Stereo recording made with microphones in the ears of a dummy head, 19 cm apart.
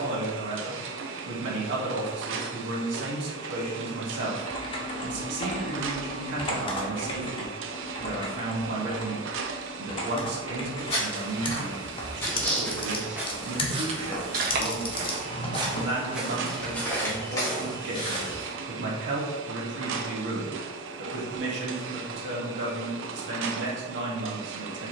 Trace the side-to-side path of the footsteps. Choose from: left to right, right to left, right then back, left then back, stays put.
right then back.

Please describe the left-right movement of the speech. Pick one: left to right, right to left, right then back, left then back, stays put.
stays put.